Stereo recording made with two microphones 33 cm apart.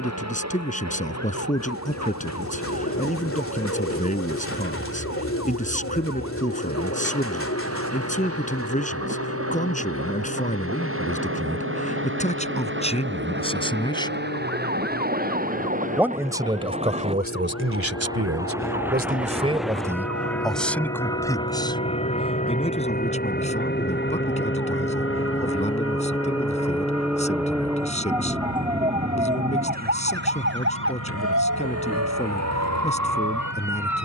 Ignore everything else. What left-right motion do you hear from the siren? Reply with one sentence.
In this clip you hear the siren travel towards the right.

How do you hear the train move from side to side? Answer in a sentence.
You can hear the train go from the right side to the left.